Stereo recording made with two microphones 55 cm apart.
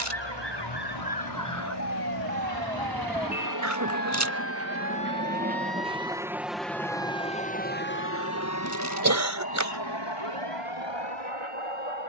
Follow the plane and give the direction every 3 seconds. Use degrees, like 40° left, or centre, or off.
50° right, 30° right, 10° left, 50° left.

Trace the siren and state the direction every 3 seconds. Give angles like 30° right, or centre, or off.
30° left, 20° right, 50° right, 60° right.